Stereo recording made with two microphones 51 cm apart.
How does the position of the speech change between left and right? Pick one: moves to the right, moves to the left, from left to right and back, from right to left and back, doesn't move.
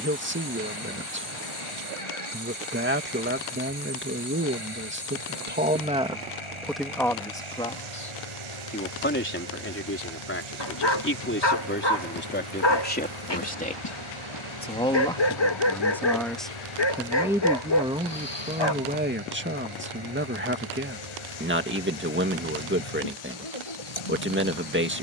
from right to left and back.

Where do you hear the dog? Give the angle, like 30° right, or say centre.
60° left.